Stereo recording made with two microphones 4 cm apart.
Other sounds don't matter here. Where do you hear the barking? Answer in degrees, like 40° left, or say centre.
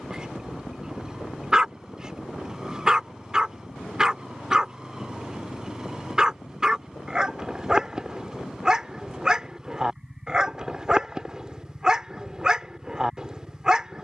20° right.